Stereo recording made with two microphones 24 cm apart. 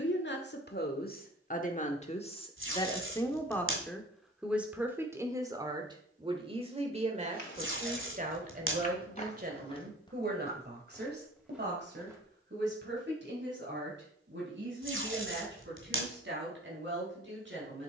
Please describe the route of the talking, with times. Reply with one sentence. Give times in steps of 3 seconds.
In this clip you hear the talking on the left from 0 s, in the centre from 3 s and on the right from 6 s.